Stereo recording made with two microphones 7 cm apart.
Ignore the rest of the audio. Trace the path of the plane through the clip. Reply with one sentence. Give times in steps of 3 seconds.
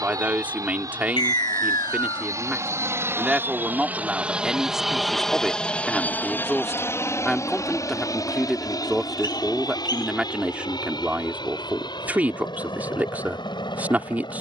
You can hear the plane on the right from 0 s, in the centre from 3 s and on the left from 6 s.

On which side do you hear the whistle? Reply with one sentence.
You can hear the whistle on the left.